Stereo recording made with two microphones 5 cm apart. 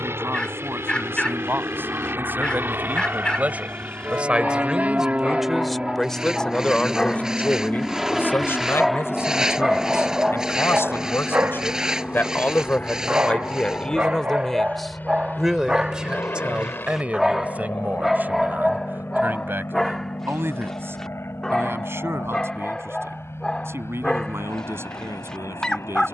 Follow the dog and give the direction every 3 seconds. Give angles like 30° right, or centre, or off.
20° left, 20° left, 10° left, 20° right, 30° right, 10° right, centre, 10° left, 10° left.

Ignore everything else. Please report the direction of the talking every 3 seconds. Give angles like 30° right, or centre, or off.
50° right, 20° right, 30° left, 50° left, 20° left, 20° right, 40° right, 50° right, 60° right.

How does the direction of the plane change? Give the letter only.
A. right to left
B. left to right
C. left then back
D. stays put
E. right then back
A.